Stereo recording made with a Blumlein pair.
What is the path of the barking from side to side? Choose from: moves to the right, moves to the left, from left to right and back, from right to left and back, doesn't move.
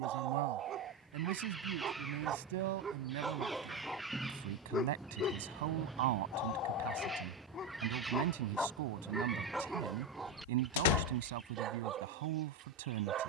from right to left and back.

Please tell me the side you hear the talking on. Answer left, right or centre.
right.